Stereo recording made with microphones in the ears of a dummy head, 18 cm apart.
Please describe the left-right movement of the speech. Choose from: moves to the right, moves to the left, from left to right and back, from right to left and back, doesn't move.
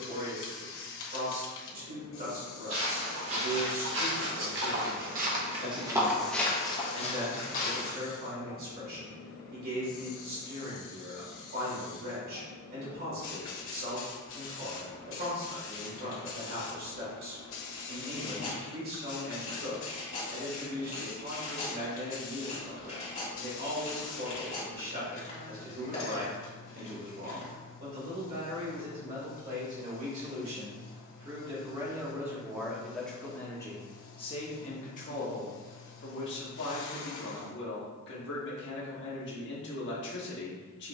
moves to the left.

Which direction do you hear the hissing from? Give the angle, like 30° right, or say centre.
70° left.